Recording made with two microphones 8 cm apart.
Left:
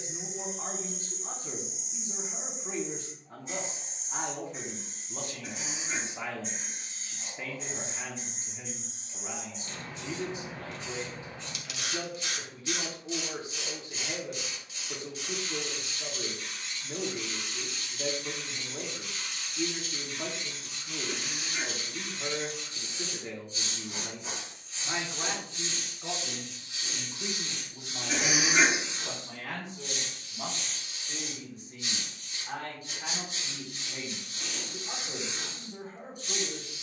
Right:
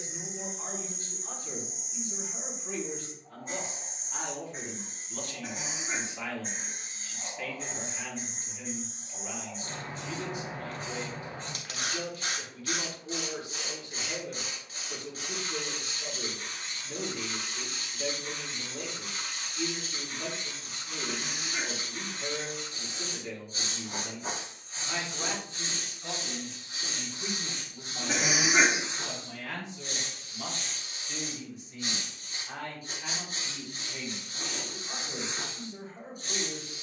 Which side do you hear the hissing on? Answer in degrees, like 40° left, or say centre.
50° right.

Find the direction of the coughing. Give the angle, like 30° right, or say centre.
40° right.